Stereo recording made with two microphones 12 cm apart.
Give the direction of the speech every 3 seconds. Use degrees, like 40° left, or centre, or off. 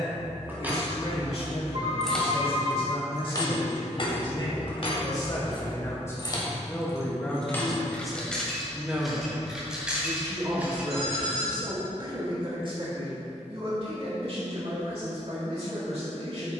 50° left, 40° left, centre, 30° right, 50° right, 60° right.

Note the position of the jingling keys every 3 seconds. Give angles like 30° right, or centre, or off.
centre, 50° left, 20° left, 10° right, off, off.